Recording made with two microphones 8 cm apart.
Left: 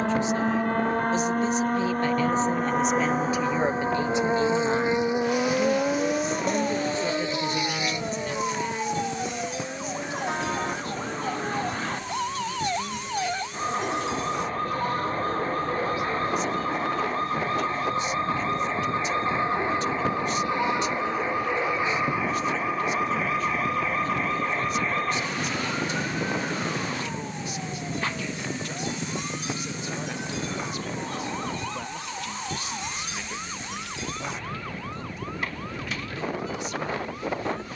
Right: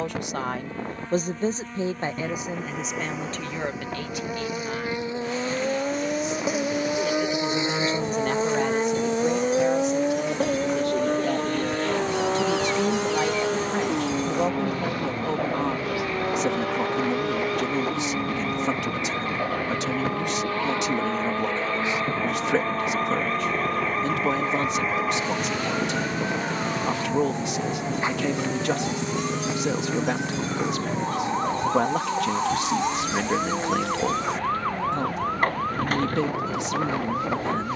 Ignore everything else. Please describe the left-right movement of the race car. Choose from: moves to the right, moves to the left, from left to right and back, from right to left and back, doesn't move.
moves to the right.